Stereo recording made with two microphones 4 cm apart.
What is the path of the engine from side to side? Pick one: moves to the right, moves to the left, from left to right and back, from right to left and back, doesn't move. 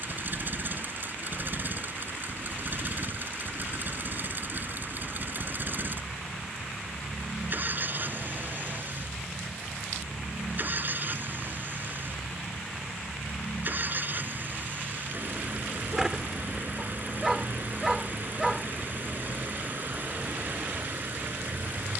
doesn't move.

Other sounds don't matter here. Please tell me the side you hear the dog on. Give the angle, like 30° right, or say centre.
10° right.